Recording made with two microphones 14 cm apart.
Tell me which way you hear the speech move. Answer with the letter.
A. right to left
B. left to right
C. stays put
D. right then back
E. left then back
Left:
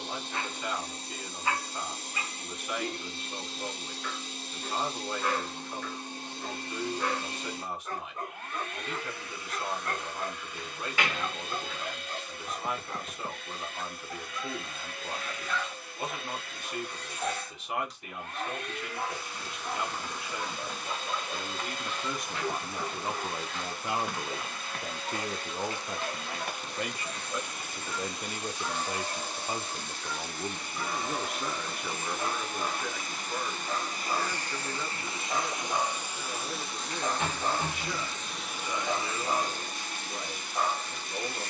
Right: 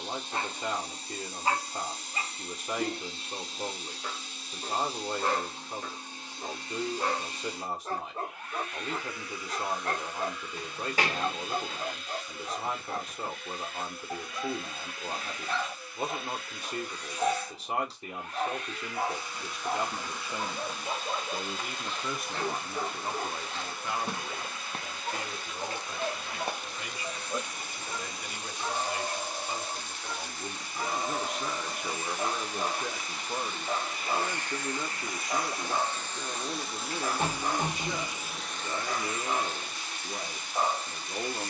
E.